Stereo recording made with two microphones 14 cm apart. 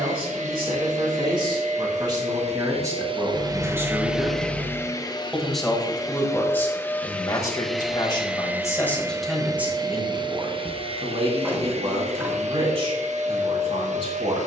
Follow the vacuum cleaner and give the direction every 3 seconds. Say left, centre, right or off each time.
right, centre, centre, right, right.